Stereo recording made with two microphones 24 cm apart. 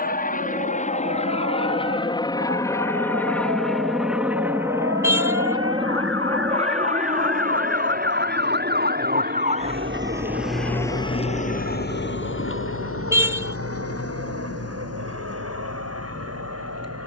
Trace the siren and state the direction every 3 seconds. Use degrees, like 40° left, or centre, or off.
70° right, 70° right, 50° right, centre, 70° left, 80° left.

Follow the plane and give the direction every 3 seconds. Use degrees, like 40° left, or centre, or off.
30° left, 10° right, 30° right, 50° right, 60° right, 60° right.